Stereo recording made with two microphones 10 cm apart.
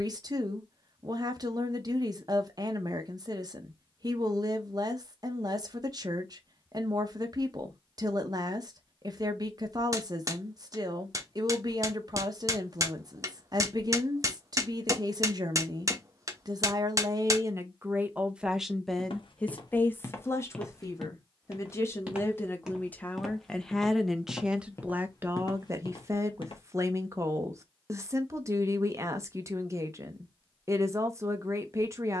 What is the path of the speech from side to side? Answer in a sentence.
In this clip you hear the speech go left and come back.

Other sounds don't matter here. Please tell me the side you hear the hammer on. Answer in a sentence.
You can hear the hammer on the right.